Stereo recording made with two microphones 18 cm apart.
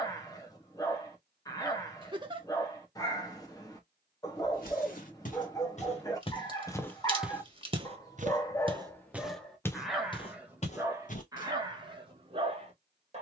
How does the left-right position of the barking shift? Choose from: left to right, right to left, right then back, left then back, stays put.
left to right.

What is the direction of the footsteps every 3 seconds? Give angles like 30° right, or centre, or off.
off, 50° left, 10° right, 20° left, off.